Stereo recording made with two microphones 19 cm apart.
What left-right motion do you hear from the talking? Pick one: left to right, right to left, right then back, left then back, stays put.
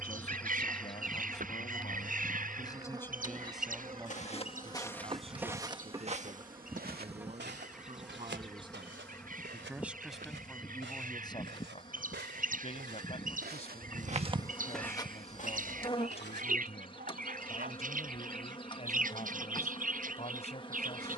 right then back.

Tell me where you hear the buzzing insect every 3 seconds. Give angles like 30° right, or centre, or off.
centre, 20° right, 10° right, 20° left, 30° left, 30° left, 30° left.